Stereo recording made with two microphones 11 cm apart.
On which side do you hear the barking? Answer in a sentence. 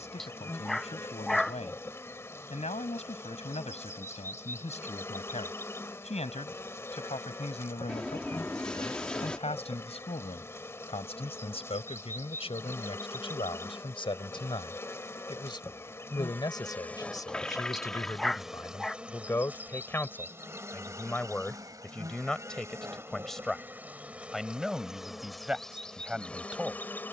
In this clip you hear the barking in the centre.